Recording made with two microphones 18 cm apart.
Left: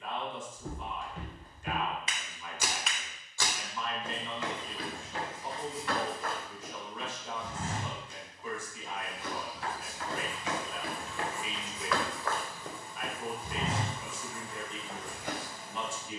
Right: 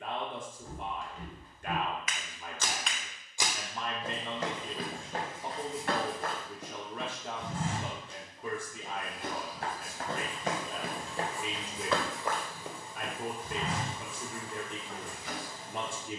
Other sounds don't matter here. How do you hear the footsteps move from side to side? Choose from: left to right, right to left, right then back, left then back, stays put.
right then back.